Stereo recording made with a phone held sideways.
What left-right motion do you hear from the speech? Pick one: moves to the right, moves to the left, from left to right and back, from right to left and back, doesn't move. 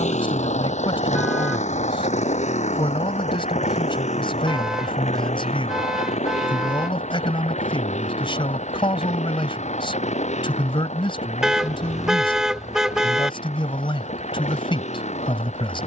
doesn't move.